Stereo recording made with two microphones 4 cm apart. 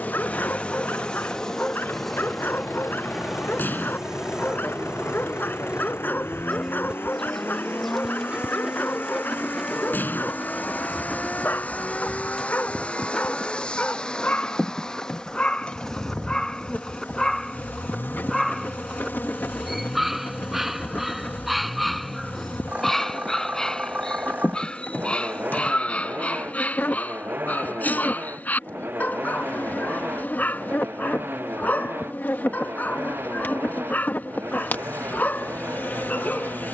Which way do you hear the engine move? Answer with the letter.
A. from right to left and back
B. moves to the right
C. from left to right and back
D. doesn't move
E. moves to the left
B.